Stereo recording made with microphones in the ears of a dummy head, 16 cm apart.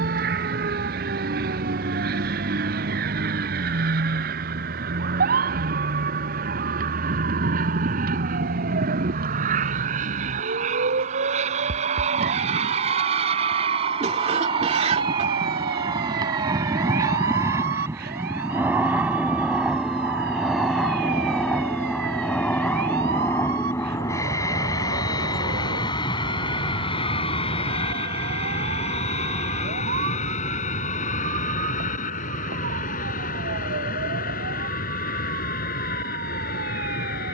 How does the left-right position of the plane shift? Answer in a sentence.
In this clip you hear the plane move to the left.